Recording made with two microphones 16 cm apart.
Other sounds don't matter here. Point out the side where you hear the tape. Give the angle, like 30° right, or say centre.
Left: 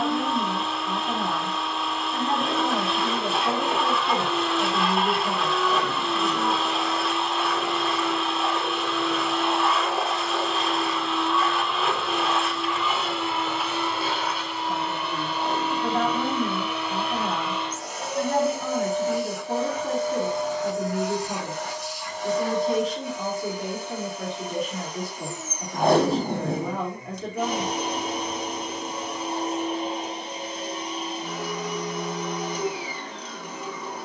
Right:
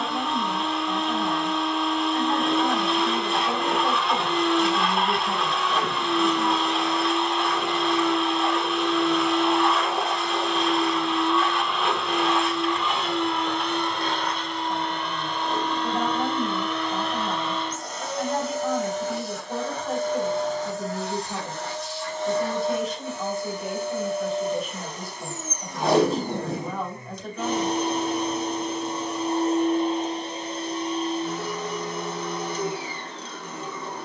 60° left.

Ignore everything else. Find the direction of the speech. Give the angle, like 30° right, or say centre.
70° left.